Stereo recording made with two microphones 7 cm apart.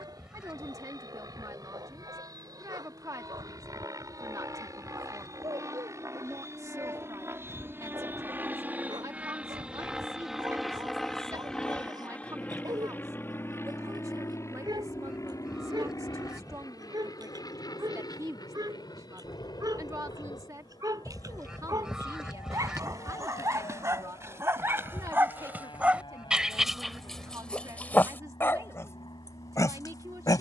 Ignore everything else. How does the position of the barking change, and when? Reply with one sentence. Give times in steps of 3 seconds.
You can hear the barking on the right from 0 s and on the left from 27 s.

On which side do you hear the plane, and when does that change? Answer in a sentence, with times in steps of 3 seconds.
In this clip you hear the plane on the right from 0 s, in the centre from 9 s and on the left from 12 s.